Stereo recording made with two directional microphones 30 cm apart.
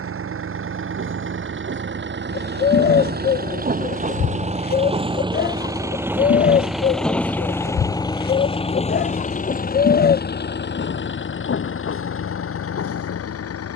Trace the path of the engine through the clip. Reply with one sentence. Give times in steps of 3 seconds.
You can hear the engine on the right from 0 s, in the centre from 6 s and on the left from 9 s.